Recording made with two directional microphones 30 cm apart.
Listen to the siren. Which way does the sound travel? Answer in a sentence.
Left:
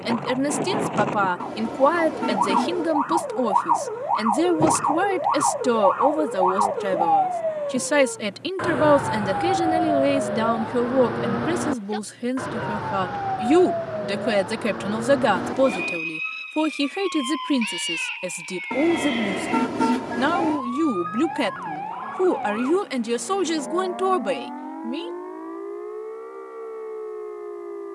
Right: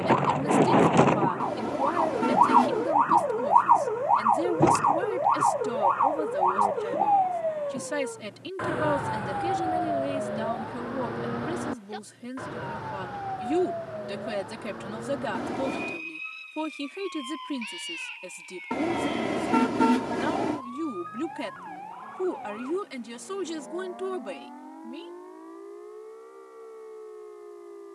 You can hear the siren go from the right side to the left.